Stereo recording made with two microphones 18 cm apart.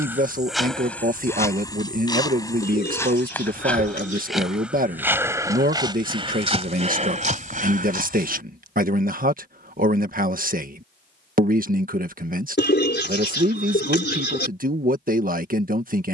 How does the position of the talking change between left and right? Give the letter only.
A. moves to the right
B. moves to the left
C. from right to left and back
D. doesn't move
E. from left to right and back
D.